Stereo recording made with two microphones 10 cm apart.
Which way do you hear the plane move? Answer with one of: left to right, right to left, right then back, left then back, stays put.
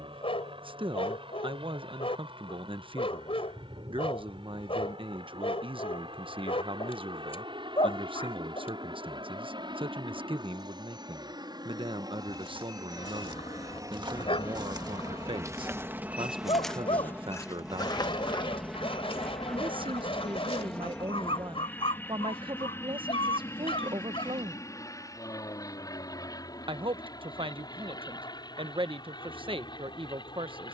right to left.